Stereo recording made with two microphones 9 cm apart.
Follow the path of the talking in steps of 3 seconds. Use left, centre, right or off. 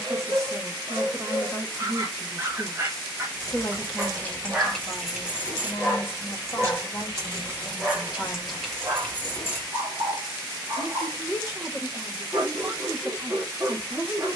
right, centre, left, right, right.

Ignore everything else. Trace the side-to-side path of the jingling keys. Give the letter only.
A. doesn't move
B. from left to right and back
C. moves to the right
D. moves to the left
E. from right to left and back
B.